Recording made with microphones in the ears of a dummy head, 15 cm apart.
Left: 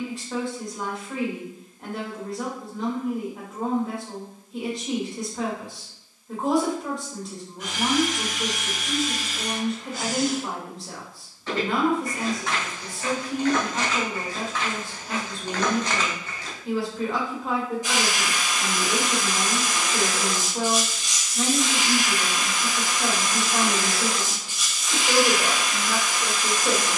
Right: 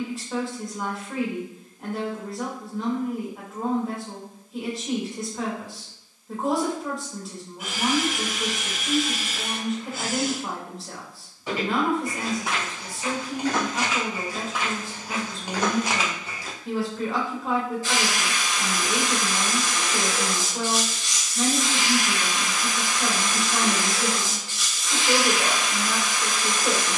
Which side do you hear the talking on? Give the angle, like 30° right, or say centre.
centre.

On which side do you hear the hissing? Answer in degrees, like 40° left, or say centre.
20° left.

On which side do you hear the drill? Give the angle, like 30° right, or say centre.
10° right.